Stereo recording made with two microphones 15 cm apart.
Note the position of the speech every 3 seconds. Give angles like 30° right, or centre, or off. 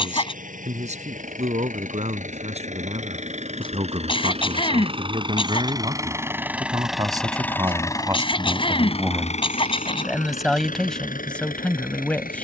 50° right, 40° right, 20° right, centre.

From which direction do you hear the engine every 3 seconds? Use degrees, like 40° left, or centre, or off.
60° right, 40° right, 10° left, 60° left.